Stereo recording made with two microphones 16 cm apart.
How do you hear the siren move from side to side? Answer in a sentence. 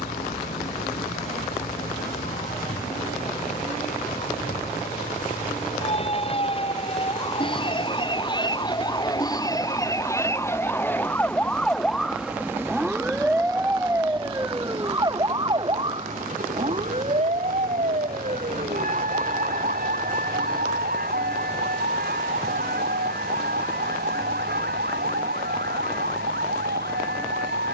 You can hear the siren move to the right.